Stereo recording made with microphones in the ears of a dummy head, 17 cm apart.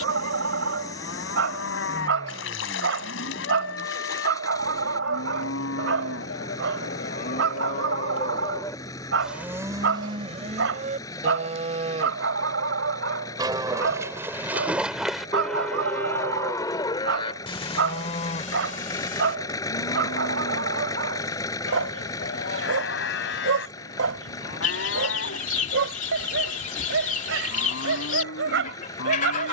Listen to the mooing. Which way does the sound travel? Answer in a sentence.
You can hear the mooing go right and come back.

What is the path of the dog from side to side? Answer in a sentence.
You can hear the dog stay in one place.